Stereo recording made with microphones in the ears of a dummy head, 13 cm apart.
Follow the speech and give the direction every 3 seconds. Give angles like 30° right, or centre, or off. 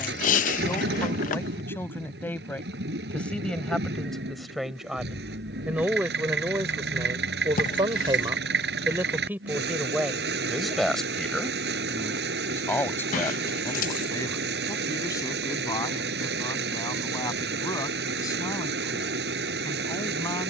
20° left, centre, 20° right, centre, 20° left, 20° left, 20° left.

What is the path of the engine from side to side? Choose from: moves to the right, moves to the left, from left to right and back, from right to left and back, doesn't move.
doesn't move.